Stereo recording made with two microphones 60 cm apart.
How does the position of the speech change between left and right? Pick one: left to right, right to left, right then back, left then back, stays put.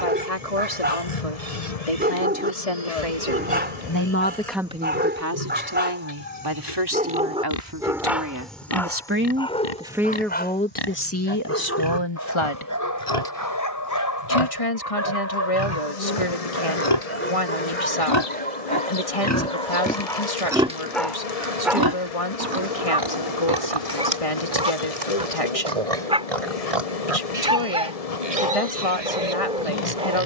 right then back.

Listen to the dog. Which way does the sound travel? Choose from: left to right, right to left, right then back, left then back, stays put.
left then back.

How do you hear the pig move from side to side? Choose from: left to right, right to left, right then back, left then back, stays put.
left to right.